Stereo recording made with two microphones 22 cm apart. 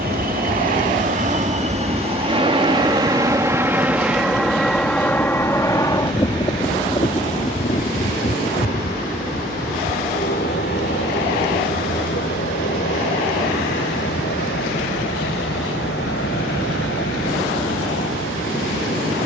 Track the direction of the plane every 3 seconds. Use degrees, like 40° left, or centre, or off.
30° right, centre, 30° left, 50° left, 50° left, 60° left, 60° left.